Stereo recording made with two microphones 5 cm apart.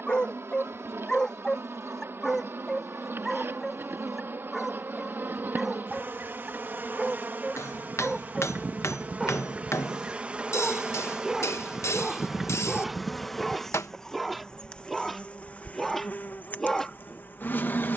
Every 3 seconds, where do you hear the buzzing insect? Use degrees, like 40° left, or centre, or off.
60° right, 50° right, 40° right, 20° right, centre, 30° left.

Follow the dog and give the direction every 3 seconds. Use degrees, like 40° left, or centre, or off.
10° left, centre, 10° right, 10° right, centre, 10° left.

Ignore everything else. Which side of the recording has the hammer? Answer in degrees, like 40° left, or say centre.
70° left.